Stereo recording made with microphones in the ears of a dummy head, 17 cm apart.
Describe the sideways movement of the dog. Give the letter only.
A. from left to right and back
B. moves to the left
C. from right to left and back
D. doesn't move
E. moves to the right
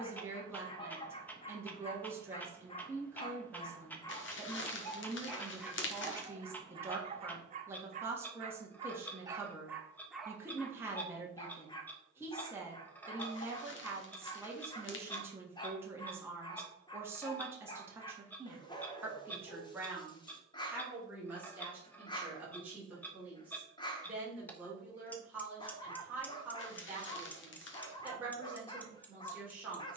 A.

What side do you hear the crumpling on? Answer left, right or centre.
left.